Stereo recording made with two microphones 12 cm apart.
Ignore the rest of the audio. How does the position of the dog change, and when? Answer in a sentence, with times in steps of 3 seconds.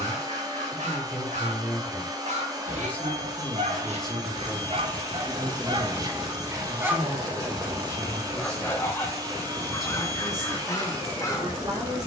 You can hear the dog on the right from 0 s, in the centre from 6 s and on the left from 9 s.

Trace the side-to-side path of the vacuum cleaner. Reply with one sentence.
In this clip you hear the vacuum cleaner stay in one place.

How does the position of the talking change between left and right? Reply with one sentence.
In this clip you hear the talking move from left to right.